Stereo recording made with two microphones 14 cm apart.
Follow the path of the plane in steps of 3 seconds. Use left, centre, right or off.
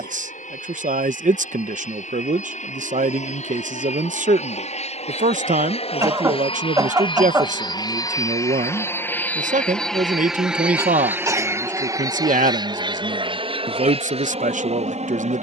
left, left, left, centre, right.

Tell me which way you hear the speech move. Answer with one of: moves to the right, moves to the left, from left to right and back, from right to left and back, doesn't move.
doesn't move.